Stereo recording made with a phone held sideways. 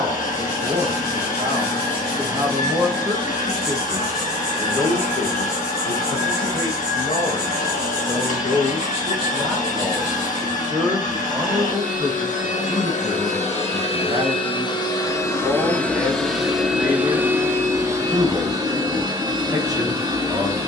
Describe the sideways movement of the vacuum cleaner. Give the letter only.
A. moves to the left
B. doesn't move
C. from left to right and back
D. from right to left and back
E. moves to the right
E.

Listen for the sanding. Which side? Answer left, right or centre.
left.